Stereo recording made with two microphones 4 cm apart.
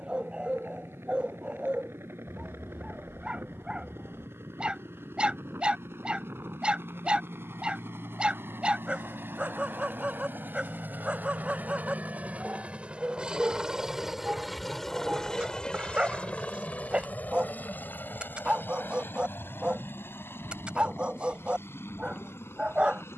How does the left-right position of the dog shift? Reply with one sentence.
In this clip you hear the dog stay in one place.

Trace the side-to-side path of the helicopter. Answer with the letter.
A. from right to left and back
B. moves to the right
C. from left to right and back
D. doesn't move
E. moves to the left
E.